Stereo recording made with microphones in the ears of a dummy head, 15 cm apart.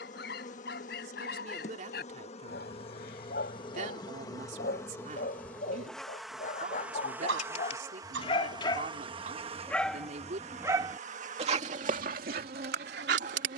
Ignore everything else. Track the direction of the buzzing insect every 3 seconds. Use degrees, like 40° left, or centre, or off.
40° left, 20° left, 10° right, 40° right, 50° right.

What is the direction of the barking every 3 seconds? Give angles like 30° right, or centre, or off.
60° left, 60° left, 40° left, 10° right, 60° right.